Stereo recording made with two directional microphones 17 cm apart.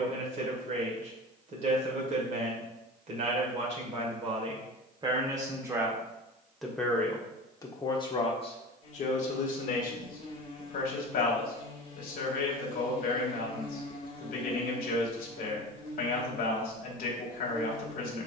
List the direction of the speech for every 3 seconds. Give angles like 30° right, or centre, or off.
40° right, 30° right, 20° left, 60° left, 60° left, 60° left.